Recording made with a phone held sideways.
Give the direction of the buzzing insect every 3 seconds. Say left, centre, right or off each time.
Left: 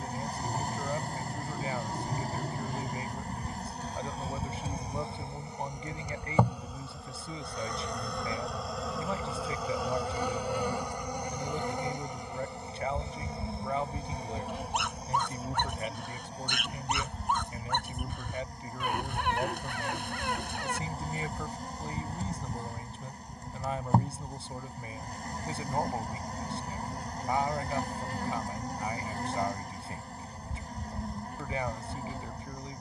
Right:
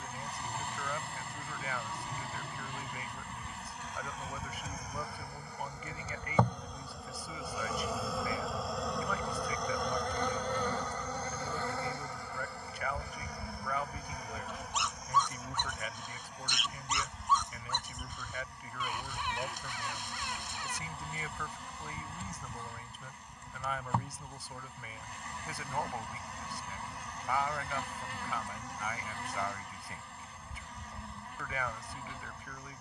left, left, centre, centre, left, left, left, left, left, left, left.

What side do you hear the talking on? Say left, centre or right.
left.